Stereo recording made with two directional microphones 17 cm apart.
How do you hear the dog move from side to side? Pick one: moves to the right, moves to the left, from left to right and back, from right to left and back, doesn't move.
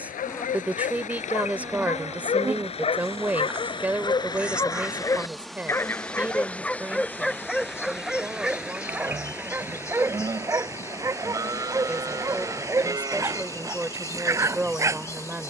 moves to the right.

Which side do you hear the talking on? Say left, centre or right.
centre.